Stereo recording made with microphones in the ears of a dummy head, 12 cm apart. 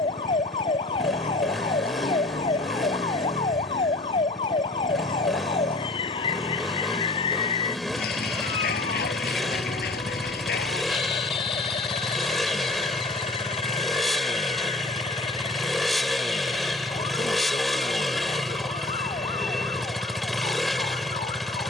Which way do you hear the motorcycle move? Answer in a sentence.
In this clip you hear the motorcycle stay put.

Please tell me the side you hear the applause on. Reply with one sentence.
You can hear the applause on the left.